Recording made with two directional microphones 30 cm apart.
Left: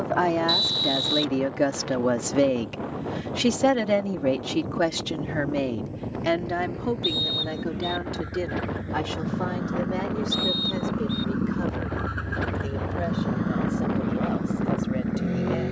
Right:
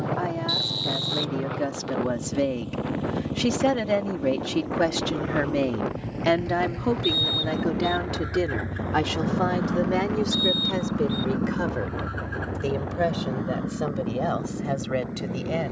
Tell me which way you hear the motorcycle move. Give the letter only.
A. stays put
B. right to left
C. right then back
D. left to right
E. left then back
B.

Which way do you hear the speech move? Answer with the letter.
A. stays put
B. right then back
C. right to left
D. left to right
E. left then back
D.